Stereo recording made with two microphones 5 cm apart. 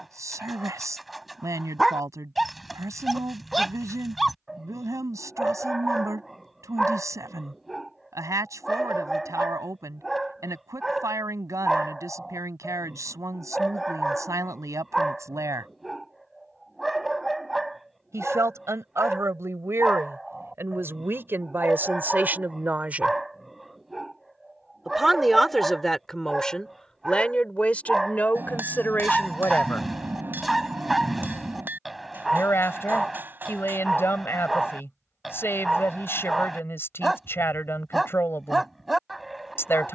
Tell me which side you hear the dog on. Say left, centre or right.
centre.